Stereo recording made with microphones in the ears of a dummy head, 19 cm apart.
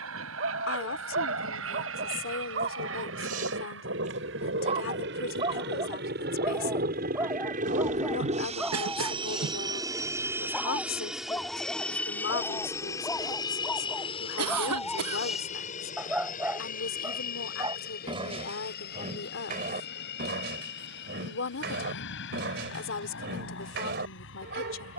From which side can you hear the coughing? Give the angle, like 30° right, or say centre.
80° right.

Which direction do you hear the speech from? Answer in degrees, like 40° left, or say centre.
60° left.